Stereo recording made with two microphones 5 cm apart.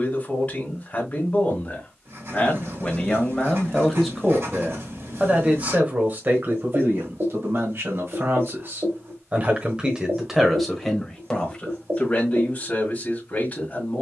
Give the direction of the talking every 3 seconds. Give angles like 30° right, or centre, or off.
30° left, 10° right, 50° right, centre, 30° left.